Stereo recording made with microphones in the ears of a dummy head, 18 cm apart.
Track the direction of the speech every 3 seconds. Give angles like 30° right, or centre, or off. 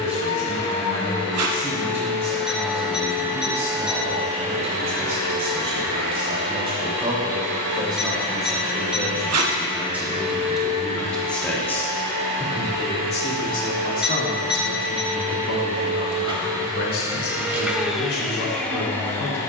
30° right, 30° right, 20° right, centre, 40° left, 70° left, 80° left.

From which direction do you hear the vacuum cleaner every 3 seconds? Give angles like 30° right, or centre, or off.
20° left, 30° right, 60° right, 70° right, 50° right, 20° right, 10° left.